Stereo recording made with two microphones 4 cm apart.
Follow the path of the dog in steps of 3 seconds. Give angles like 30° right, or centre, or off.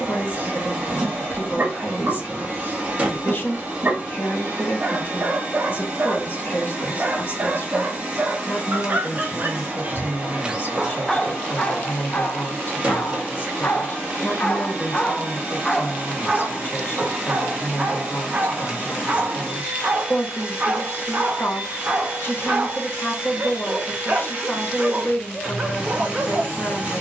40° right, 40° right, 40° right, 10° right, 40° left, 10° right, 30° right, 30° right, 30° right.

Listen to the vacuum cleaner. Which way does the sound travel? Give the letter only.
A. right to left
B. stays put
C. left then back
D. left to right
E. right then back
B.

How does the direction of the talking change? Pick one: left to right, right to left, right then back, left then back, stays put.
stays put.